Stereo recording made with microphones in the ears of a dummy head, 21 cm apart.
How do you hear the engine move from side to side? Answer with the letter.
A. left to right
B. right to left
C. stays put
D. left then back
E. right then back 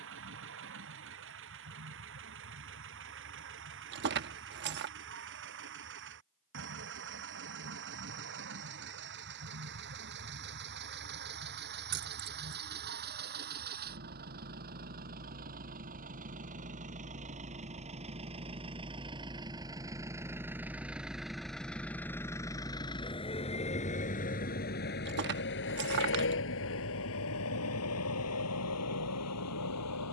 B.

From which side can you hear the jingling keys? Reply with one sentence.
In this clip you hear the jingling keys on the right.